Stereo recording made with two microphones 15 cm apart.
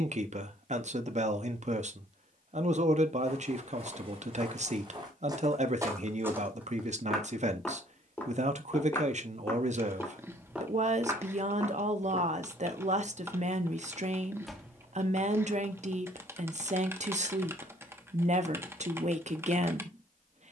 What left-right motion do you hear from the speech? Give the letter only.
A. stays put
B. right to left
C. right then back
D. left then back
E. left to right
A.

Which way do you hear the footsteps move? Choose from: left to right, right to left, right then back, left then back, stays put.
left then back.